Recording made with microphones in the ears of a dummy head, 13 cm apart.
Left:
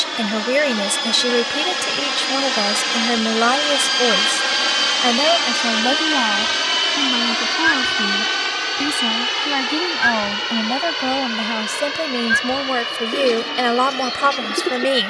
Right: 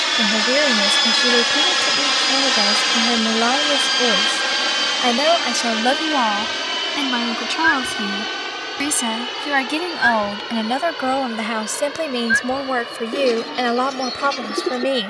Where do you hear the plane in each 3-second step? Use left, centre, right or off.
right, centre, left, left, left.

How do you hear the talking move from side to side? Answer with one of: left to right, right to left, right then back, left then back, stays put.
right then back.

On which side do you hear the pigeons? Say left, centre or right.
centre.